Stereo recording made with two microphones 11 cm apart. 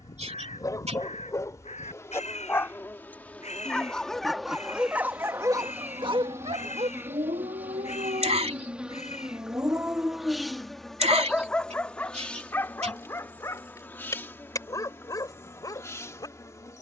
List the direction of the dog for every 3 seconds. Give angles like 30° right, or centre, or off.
30° left, 10° right, 60° right, 10° right, 30° left, 30° left.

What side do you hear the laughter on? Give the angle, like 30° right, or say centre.
70° right.